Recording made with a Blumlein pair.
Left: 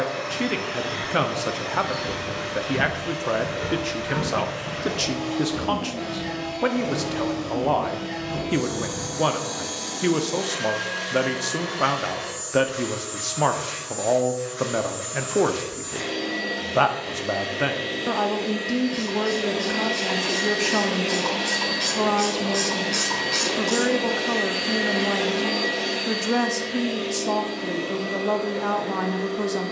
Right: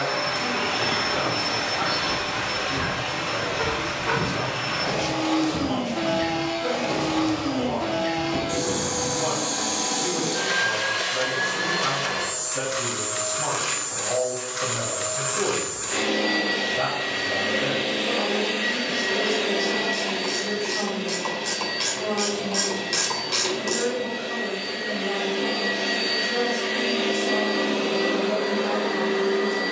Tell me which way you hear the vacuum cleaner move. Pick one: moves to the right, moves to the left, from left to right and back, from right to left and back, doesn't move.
from right to left and back.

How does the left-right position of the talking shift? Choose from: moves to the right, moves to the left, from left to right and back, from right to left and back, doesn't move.
doesn't move.